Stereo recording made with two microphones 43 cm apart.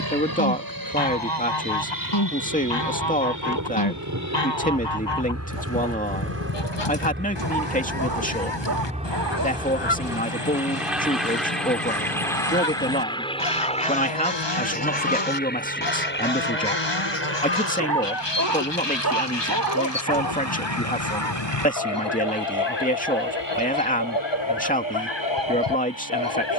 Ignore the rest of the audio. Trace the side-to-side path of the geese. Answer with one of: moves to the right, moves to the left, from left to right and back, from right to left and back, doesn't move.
doesn't move.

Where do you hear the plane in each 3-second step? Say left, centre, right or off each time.
right, right, right, centre, centre, left, left, left, left.